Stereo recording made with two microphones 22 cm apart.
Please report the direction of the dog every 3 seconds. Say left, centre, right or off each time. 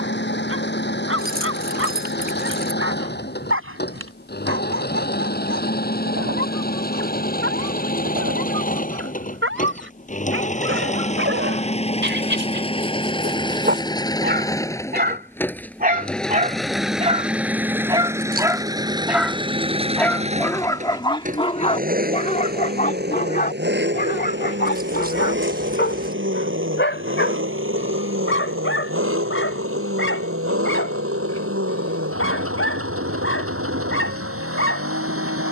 right, right, right, right, right, right, centre, left, left, left, left, left.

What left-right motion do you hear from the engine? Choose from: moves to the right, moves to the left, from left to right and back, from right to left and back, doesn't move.
moves to the right.